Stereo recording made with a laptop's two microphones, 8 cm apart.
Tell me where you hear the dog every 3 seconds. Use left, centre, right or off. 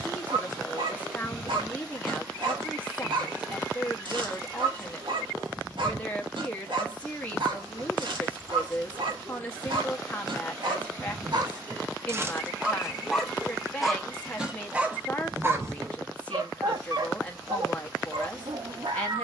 right, right, right, right, centre, right, right.